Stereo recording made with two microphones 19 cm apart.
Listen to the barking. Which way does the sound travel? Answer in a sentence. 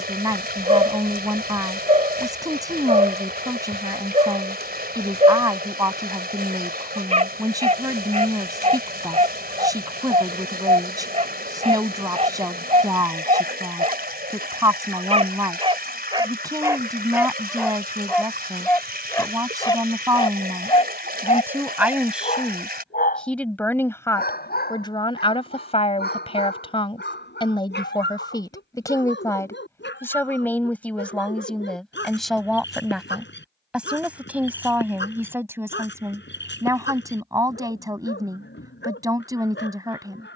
You can hear the barking go from the right side to the left.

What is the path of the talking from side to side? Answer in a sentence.
You can hear the talking go left and come back.